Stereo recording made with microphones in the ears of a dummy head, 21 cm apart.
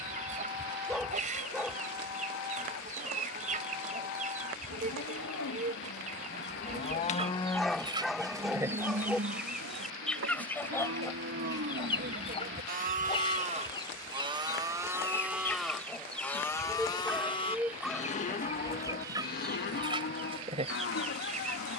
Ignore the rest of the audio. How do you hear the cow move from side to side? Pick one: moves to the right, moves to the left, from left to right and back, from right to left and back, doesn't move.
from left to right and back.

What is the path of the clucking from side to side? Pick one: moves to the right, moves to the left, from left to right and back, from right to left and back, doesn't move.
from right to left and back.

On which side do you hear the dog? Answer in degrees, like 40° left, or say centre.
centre.